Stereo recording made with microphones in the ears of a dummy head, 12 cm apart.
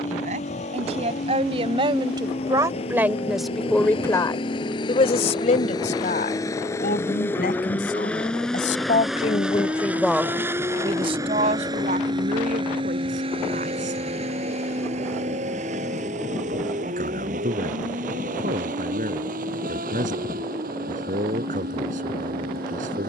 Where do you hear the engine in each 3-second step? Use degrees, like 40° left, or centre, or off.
50° left, 40° left, 10° left, 20° right, 40° right, 60° right, 70° right, 70° right.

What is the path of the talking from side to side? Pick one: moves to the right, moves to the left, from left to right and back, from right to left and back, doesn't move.
from right to left and back.